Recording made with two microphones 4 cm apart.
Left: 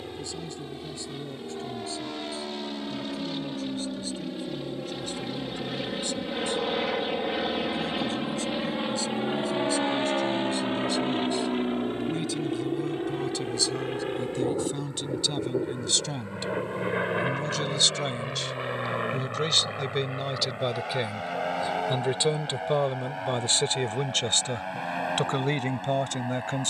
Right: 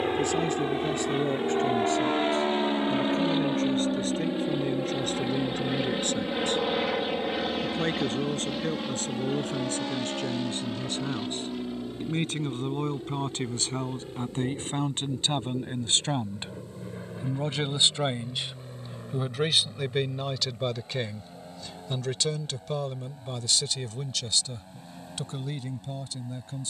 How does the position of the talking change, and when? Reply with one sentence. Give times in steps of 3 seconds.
In this clip you hear the talking on the right from 0 s, in the centre from 18 s and on the left from 21 s.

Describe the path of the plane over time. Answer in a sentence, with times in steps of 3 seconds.
In this clip you hear the plane on the right from 0 s, in the centre from 6 s and on the left from 9 s.